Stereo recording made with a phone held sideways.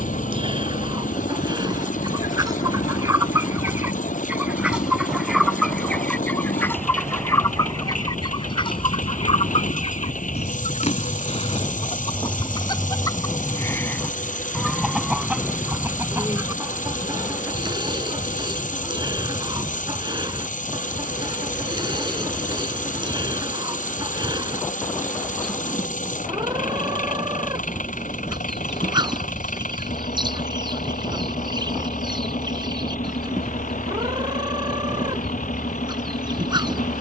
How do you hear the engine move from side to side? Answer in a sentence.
In this clip you hear the engine stay put.